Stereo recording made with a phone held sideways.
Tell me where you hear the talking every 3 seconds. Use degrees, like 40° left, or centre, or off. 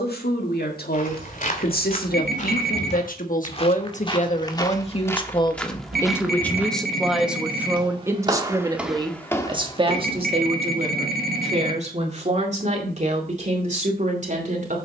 70° left, 40° left, 10° right, 40° right, 50° right.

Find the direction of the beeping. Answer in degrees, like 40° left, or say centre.
70° right.